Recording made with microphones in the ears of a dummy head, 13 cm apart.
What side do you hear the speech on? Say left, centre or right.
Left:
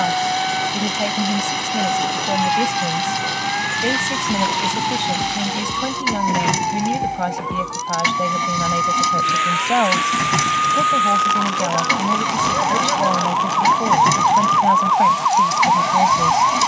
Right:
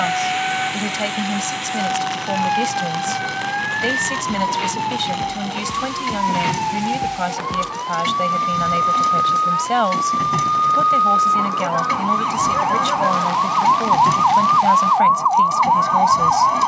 right.